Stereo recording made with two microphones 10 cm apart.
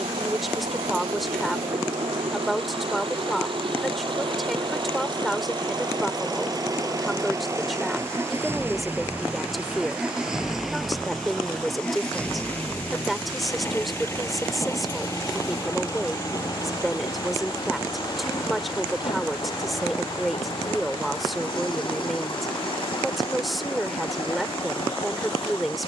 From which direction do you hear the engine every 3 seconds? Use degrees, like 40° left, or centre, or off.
60° right, 50° right, 30° right, centre, 20° left, 40° left, 50° left, 50° left, 60° left.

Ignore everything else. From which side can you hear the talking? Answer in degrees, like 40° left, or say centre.
centre.